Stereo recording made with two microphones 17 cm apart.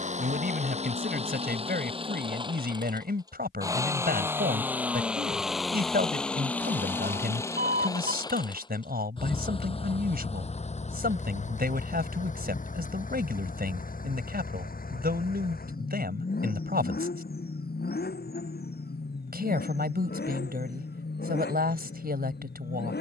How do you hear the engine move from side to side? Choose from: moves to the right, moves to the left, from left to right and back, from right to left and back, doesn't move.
moves to the left.